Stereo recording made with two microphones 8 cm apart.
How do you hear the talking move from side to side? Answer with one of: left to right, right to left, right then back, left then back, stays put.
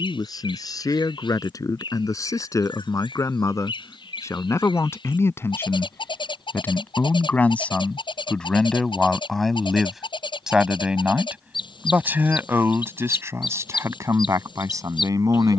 left to right.